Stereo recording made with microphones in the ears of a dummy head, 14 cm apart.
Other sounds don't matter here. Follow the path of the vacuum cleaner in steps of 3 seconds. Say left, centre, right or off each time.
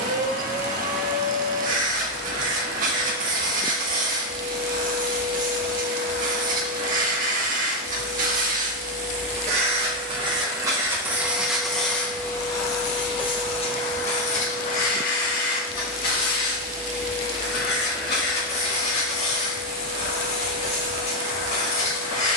right, right, right, right, left, left, left, left.